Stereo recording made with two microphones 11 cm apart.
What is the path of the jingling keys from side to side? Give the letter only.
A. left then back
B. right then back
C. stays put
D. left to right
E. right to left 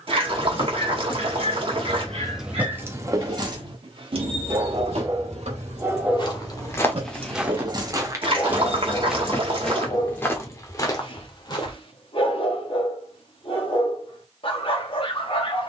B.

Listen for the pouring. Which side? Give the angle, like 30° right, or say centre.
50° right.